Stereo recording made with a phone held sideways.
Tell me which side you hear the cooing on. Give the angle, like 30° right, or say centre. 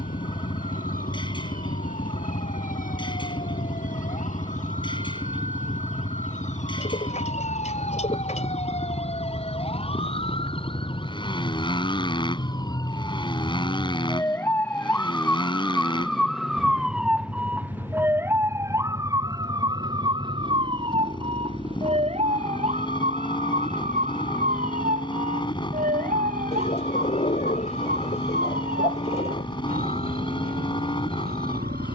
40° left.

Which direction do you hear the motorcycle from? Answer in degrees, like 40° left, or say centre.
30° left.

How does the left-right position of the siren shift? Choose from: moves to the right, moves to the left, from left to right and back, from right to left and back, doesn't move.
moves to the right.